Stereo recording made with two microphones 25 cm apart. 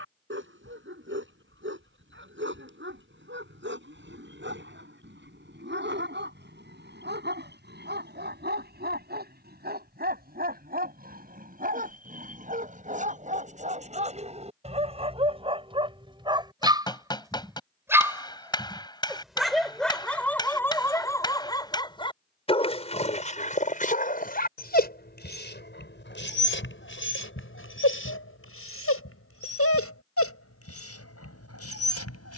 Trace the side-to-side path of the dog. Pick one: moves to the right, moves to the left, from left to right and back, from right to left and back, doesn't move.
moves to the left.